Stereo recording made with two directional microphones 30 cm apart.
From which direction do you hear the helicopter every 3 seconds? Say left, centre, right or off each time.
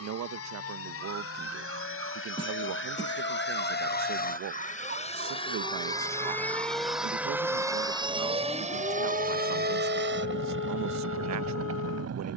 left, left, centre, right.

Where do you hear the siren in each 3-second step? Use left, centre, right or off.
right, right, centre, left.